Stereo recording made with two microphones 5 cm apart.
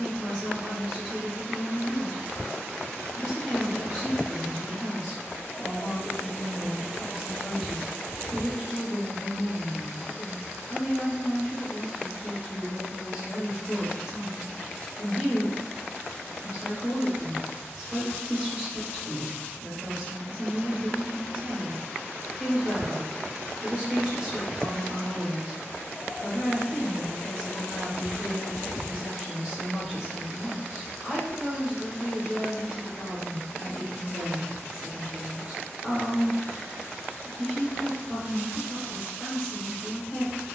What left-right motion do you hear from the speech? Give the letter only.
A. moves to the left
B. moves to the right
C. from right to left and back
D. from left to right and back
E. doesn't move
E.